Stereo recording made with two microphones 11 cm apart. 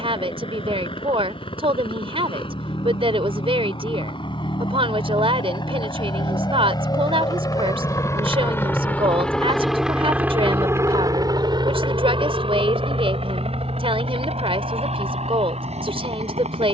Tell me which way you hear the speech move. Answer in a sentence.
In this clip you hear the speech stay put.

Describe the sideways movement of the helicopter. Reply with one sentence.
You can hear the helicopter go from the left side to the right.